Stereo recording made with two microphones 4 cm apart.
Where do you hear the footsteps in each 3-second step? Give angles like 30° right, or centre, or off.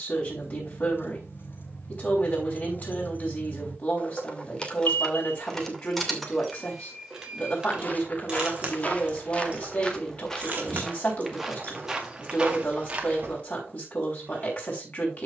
off, off, 40° left, 10° left, 30° right.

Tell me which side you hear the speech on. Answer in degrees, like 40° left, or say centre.
50° left.